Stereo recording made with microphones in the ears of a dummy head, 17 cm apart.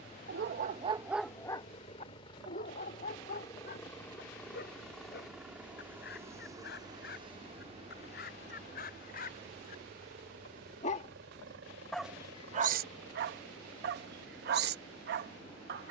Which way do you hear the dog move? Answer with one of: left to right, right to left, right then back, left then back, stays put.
left then back.